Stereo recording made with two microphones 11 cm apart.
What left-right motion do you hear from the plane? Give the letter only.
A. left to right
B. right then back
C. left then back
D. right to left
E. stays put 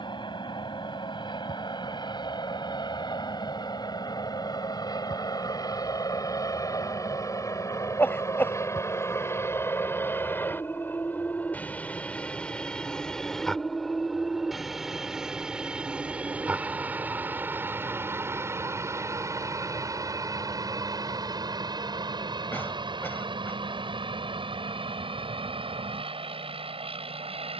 A.